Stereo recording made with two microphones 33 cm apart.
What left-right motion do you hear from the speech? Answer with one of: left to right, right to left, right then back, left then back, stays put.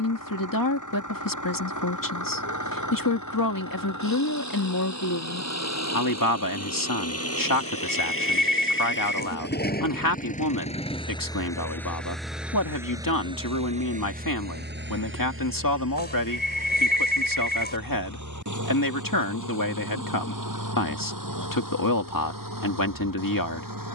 stays put.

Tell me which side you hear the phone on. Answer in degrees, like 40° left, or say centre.
30° left.